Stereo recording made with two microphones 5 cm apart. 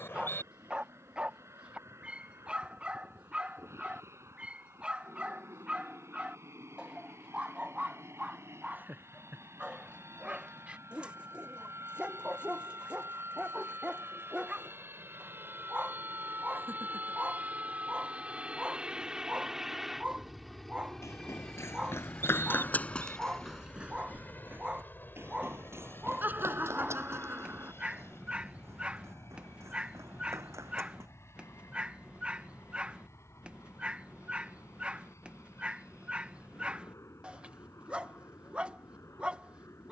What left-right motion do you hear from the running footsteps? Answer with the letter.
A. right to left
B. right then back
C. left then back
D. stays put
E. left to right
E.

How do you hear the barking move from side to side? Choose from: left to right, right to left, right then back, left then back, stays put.
stays put.